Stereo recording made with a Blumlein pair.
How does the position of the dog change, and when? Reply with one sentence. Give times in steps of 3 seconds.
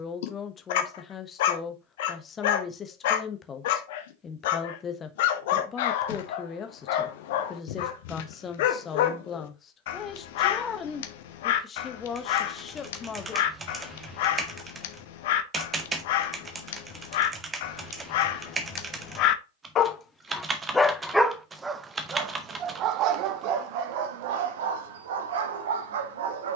You can hear the dog on the left from 0 s and on the right from 21 s.